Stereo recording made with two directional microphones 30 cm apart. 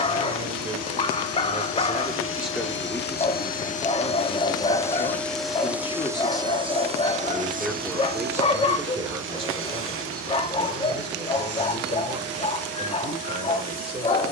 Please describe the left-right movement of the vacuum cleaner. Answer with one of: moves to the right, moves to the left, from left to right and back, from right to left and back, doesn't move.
moves to the right.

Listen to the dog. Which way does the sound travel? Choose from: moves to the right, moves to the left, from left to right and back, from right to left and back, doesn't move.
doesn't move.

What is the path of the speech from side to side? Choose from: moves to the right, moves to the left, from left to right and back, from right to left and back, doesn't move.
from right to left and back.